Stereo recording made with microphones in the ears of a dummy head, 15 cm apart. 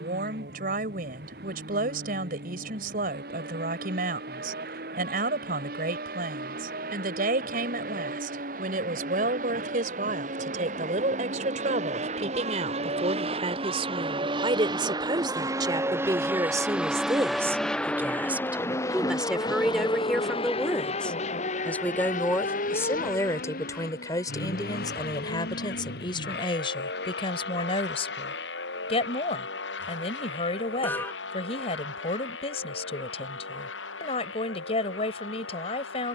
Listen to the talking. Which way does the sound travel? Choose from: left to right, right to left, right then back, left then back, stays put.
right to left.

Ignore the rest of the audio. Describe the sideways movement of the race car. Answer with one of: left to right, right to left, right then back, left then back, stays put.
right to left.